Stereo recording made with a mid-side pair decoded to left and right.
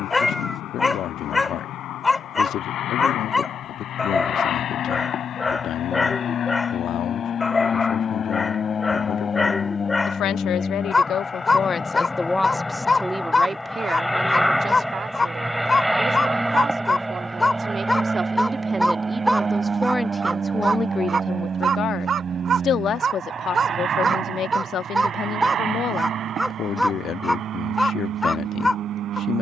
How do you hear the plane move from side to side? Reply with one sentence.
You can hear the plane move from left to right.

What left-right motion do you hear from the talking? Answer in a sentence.
In this clip you hear the talking go right and come back.